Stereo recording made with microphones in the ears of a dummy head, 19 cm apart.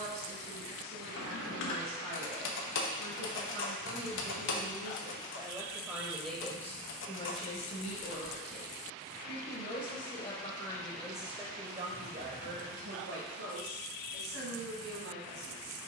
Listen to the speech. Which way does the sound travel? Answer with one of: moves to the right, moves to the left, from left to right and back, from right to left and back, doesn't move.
from right to left and back.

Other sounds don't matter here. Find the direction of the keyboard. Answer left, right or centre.
left.